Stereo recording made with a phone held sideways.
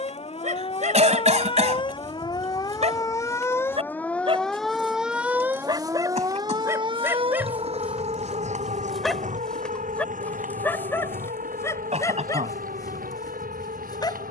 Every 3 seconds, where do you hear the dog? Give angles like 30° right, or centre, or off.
60° right, 40° right, 10° right, 10° left, 30° left.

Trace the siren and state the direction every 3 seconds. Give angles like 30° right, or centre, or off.
40° left, centre, 40° right, 70° right, 80° right.